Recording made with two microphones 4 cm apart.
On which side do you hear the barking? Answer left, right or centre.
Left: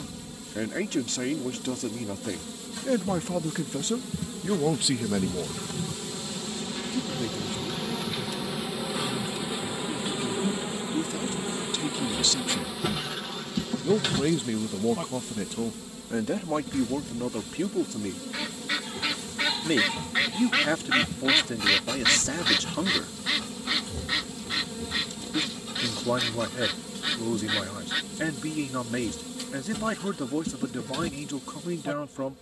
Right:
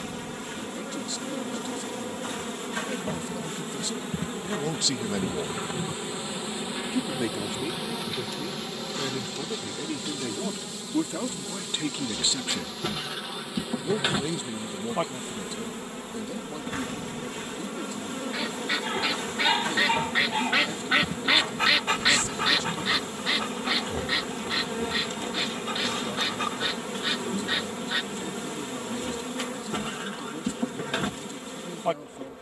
right.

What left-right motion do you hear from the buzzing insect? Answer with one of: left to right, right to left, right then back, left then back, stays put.
left then back.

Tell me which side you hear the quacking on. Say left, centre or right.
centre.